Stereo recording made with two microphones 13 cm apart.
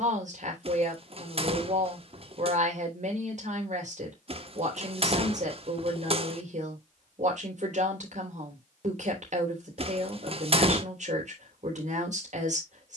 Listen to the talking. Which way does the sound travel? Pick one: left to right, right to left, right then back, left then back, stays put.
stays put.